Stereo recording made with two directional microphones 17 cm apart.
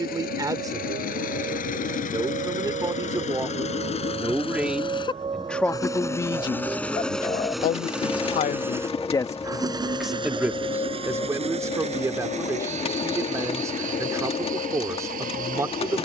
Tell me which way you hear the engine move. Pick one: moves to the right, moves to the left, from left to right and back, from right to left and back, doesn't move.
moves to the right.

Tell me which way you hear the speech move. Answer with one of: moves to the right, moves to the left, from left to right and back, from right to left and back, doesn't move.
from right to left and back.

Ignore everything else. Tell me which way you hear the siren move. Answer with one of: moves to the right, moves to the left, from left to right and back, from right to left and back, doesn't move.
moves to the left.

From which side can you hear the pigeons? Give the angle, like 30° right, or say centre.
40° left.